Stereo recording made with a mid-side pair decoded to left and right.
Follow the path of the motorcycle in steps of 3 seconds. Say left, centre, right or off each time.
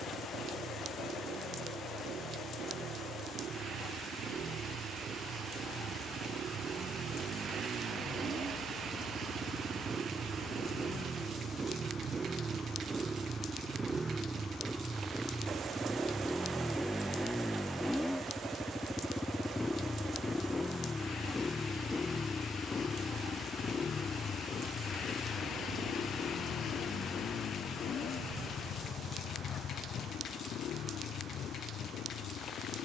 right, right, right, right, right, centre, centre, left, left, left, left.